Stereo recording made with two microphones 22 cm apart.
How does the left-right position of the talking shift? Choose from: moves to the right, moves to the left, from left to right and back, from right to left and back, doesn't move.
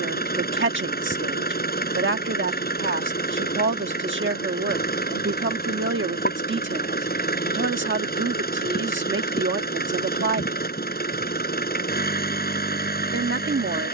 doesn't move.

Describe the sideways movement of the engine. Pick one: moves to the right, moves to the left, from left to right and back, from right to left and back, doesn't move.
doesn't move.